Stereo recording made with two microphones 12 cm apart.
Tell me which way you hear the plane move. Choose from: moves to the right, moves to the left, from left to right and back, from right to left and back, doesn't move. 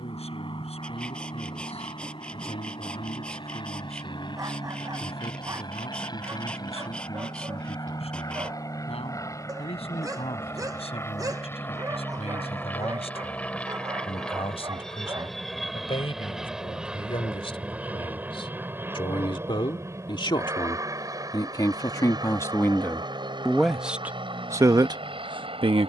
moves to the right.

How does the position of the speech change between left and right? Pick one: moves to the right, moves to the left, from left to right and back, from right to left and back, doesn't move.
moves to the right.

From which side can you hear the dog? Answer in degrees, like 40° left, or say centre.
30° right.